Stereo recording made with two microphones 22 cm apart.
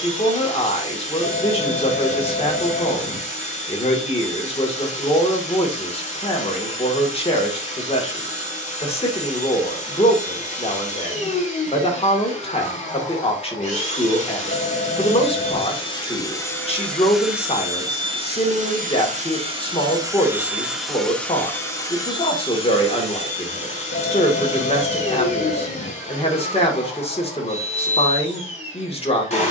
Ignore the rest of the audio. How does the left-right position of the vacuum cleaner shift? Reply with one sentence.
You can hear the vacuum cleaner move from left to right and back again.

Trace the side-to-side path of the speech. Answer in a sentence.
In this clip you hear the speech stay put.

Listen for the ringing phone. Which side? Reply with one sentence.
In this clip you hear the ringing phone on the left.